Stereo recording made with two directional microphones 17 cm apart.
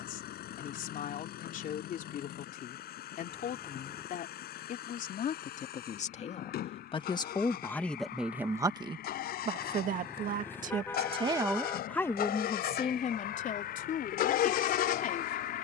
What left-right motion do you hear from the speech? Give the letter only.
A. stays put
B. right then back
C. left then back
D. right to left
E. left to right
B.